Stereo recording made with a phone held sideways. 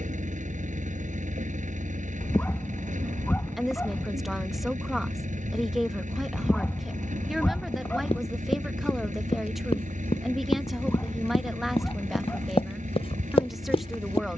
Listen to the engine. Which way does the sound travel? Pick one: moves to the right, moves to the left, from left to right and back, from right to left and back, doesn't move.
doesn't move.